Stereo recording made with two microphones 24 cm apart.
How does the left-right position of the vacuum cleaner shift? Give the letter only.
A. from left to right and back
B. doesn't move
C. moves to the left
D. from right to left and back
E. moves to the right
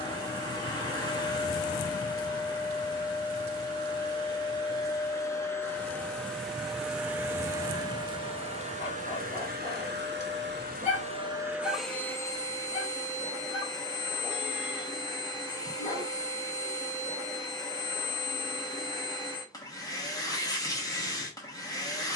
A.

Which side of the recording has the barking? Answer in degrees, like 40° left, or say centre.
30° left.